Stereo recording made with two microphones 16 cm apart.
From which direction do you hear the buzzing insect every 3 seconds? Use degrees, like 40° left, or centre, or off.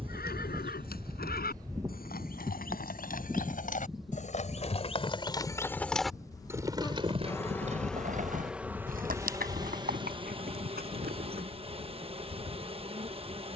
30° right, centre, 10° left, 30° right, 40° right.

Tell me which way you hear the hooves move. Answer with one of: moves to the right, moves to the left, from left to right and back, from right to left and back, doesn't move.
moves to the right.